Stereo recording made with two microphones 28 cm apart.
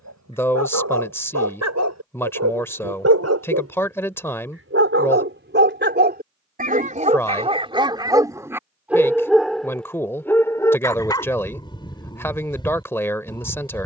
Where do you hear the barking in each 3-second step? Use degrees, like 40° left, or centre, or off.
70° right, 50° right, 20° right, 10° left, 20° left.